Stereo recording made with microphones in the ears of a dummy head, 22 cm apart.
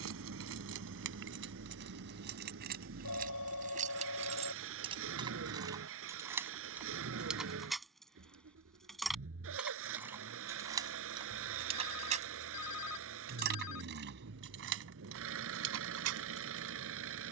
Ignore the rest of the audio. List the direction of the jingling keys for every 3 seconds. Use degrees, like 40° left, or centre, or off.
50° right, 30° right, centre, 10° right, 50° right, 70° right.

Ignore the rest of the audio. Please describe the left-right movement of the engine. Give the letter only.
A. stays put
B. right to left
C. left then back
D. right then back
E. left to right
A.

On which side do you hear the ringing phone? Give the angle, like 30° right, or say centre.
70° left.